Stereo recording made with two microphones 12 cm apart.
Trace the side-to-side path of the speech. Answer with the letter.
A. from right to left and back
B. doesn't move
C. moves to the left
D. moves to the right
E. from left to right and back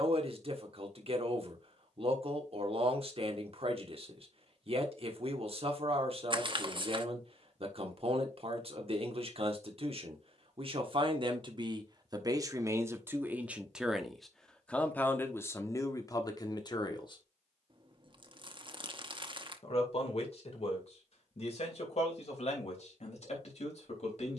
C.